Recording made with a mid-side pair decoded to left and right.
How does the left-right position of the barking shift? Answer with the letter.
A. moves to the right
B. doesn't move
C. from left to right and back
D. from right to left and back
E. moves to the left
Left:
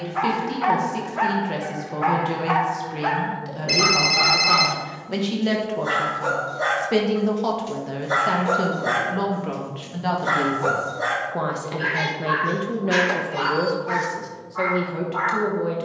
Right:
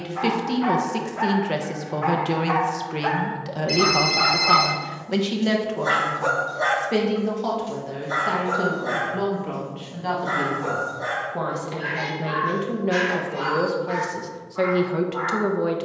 C.